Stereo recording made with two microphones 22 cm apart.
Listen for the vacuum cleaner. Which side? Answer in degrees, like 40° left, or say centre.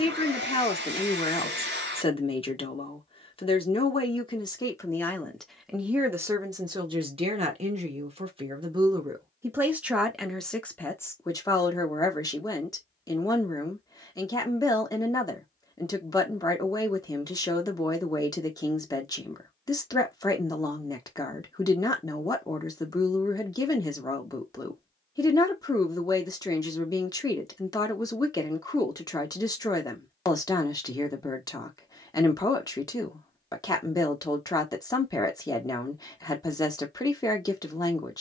50° right.